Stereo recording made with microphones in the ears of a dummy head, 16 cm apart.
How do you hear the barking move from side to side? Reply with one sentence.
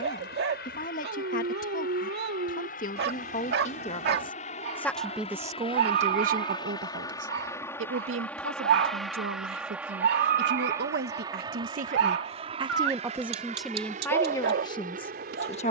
You can hear the barking stay in one place.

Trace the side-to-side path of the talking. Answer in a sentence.
In this clip you hear the talking go right and come back.